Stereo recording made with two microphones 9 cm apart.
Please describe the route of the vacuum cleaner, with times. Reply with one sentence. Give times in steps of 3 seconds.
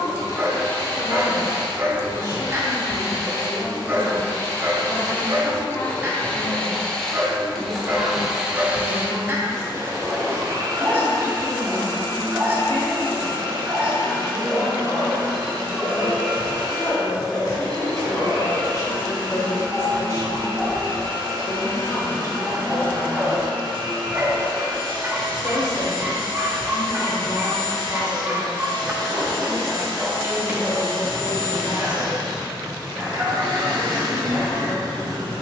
You can hear the vacuum cleaner on the left from 0 s, in the centre from 6 s and on the right from 9 s.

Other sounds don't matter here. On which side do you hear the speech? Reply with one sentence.
You can hear the speech on the left.